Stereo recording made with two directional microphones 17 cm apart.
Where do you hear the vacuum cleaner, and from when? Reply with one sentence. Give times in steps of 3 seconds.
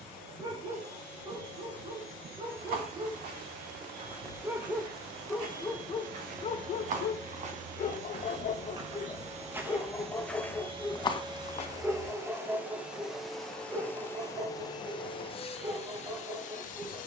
You can hear the vacuum cleaner on the right from 0 s, in the centre from 12 s and on the left from 15 s.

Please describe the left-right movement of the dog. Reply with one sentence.
You can hear the dog move from right to left and back again.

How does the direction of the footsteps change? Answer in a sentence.
You can hear the footsteps move from right to left.